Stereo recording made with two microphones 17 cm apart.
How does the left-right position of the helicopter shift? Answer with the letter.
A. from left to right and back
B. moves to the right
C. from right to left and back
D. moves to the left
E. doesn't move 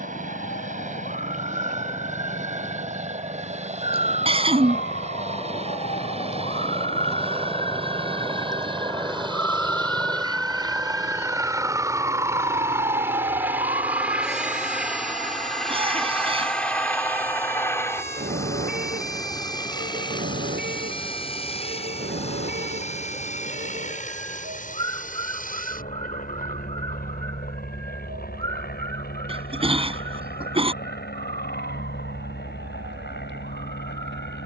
D.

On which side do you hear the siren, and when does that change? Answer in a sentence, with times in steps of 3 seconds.
In this clip you hear the siren on the left from 0 s, in the centre from 9 s and on the right from 12 s.